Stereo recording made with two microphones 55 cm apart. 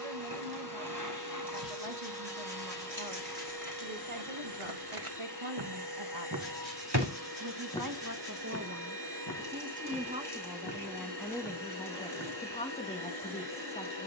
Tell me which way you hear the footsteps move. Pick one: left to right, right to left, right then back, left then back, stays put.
right to left.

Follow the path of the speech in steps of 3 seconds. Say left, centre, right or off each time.
right, right, right, centre, centre.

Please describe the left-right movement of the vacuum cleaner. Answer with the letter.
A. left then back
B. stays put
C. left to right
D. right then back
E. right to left
B.